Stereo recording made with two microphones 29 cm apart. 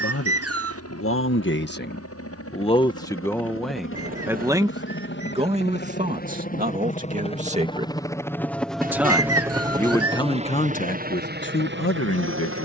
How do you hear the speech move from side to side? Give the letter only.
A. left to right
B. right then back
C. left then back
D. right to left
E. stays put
B.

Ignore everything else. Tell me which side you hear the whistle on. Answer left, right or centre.
right.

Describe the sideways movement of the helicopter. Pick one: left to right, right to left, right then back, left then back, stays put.
left to right.